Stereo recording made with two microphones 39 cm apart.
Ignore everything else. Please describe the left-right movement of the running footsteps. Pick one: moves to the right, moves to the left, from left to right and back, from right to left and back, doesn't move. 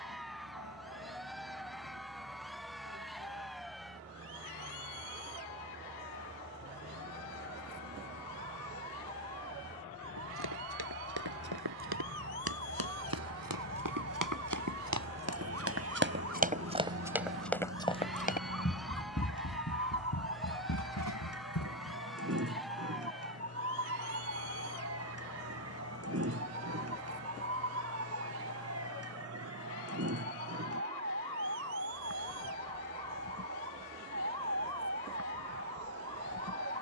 moves to the left.